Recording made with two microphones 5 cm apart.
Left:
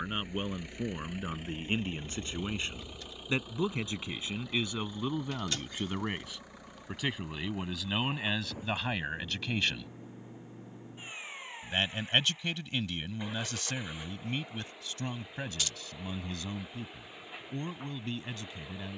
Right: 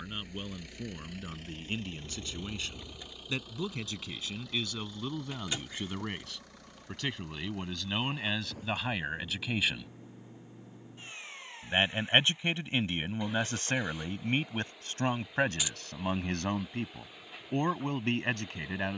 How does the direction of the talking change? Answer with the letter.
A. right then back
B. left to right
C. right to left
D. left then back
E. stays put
B.